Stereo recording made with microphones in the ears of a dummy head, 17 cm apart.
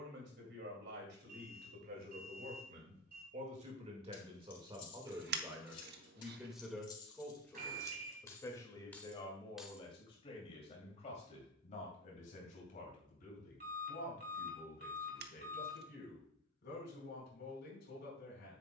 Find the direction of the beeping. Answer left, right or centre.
right.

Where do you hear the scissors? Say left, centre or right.
right.